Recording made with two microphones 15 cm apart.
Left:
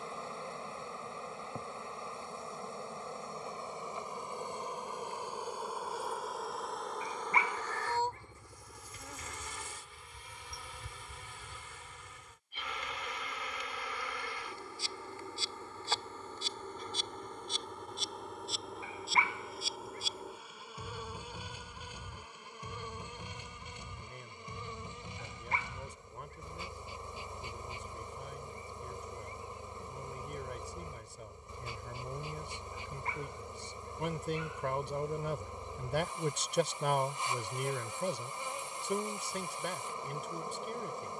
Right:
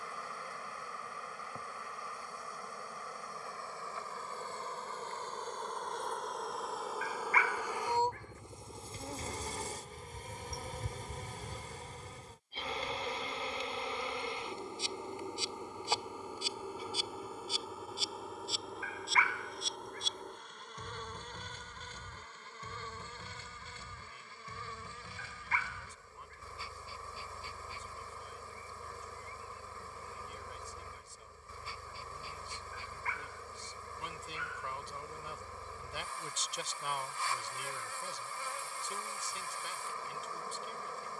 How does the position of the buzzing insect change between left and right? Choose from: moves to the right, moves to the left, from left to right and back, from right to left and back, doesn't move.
from left to right and back.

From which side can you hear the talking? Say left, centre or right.
left.